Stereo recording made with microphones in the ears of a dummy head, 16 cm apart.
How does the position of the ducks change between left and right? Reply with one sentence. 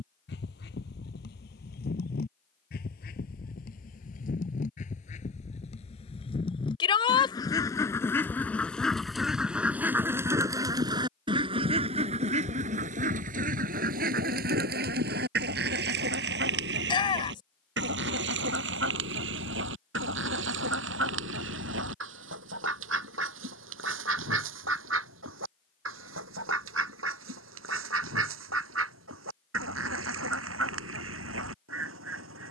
In this clip you hear the ducks move to the right.